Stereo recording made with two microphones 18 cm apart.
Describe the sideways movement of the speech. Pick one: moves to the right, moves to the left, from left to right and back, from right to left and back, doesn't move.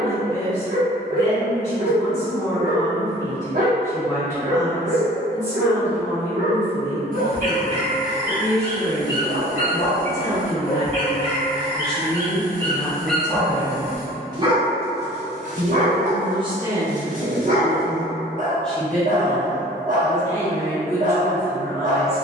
from left to right and back.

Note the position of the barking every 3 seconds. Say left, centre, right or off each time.
right, right, right, left, centre, right, right, right.